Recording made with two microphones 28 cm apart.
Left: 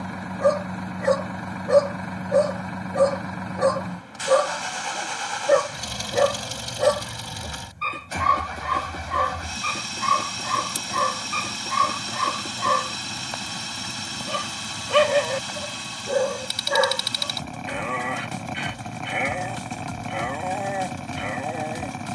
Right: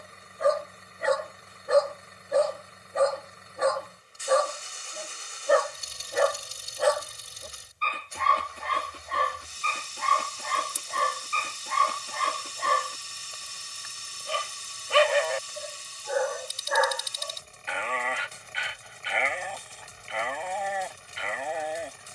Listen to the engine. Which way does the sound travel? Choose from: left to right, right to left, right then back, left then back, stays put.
stays put.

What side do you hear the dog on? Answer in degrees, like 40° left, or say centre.
50° left.